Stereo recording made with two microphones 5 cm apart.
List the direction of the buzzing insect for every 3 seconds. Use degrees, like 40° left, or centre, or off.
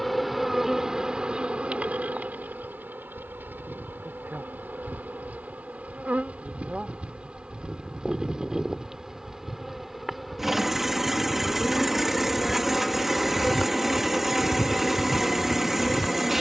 20° right, 40° right, 20° right, centre, 10° left, 20° left.